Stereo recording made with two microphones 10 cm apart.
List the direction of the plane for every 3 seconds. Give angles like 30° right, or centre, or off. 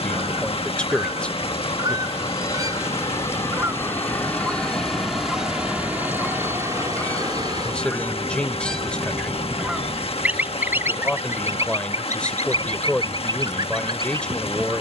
40° left, 10° left, 40° right, 60° right, 70° right.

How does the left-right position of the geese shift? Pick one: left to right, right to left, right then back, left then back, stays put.
left then back.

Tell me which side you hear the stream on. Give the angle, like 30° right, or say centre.
80° left.